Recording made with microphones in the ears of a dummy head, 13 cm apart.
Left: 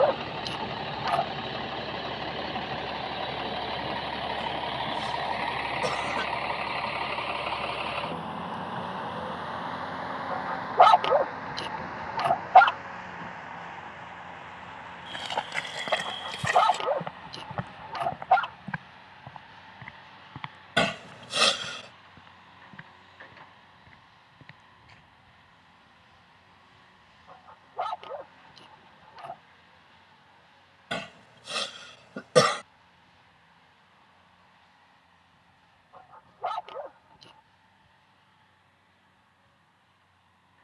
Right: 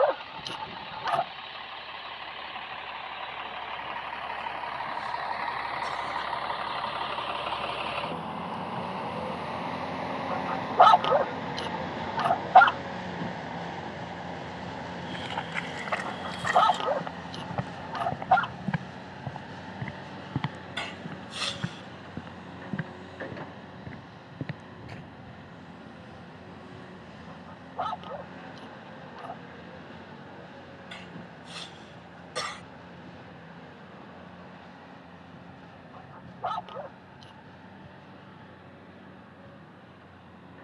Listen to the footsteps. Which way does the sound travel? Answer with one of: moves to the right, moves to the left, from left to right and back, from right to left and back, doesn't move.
moves to the right.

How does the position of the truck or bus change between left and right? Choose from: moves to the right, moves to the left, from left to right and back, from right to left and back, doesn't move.
moves to the right.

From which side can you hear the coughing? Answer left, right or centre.
left.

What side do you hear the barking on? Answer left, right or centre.
centre.